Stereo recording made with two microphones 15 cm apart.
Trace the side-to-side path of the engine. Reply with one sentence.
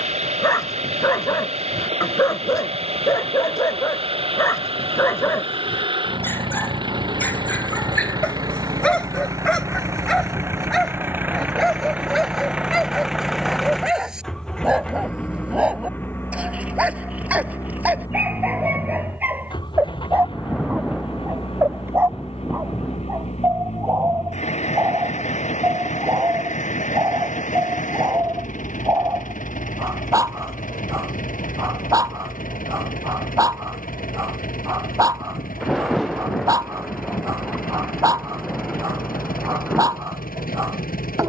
You can hear the engine move to the left.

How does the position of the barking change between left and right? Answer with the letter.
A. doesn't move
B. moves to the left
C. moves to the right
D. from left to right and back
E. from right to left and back
C.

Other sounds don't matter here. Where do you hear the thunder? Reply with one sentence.
In this clip you hear the thunder in the centre.